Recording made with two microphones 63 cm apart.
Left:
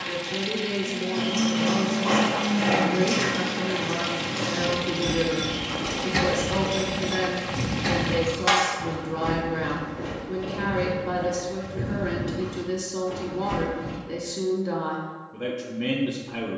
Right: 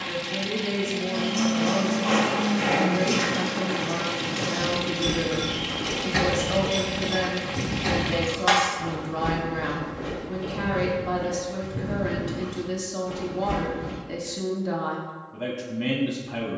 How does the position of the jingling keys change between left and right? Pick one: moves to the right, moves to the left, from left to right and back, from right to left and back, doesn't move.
moves to the left.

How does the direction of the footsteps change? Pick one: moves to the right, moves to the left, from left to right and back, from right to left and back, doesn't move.
from right to left and back.